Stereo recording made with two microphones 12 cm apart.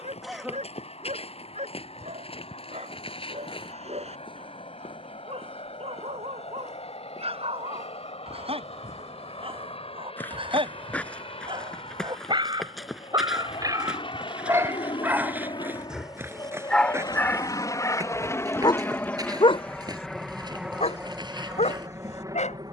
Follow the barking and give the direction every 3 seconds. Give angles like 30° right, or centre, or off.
60° right, 60° right, 50° right, 50° right, 30° right, centre, 50° left, 70° left.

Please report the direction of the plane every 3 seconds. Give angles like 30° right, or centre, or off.
60° left, 60° left, 60° left, 60° left, 50° left, 40° left, 10° left, 20° right.